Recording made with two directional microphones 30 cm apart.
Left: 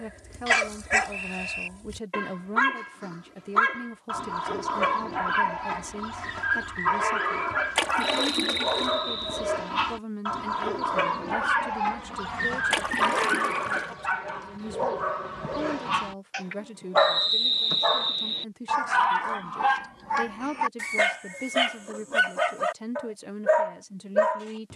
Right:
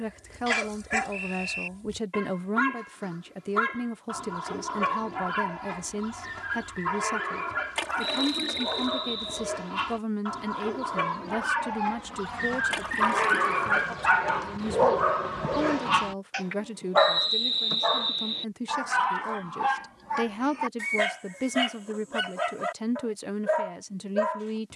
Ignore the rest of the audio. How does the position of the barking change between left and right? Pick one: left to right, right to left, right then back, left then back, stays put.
right then back.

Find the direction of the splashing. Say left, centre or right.
left.